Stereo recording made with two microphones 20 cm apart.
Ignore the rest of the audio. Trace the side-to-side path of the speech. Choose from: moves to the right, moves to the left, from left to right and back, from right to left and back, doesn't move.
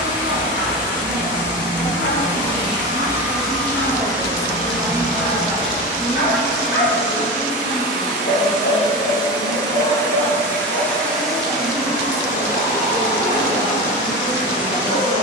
moves to the left.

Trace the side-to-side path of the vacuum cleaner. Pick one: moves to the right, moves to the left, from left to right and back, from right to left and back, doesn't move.
from right to left and back.